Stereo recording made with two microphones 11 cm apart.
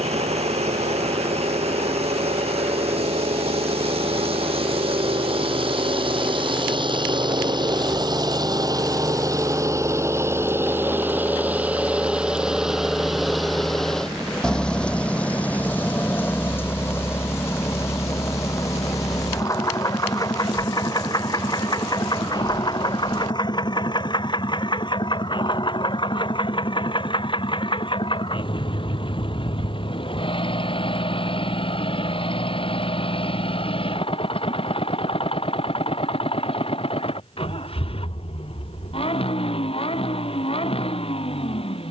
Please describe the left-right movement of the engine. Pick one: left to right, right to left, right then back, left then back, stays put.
right to left.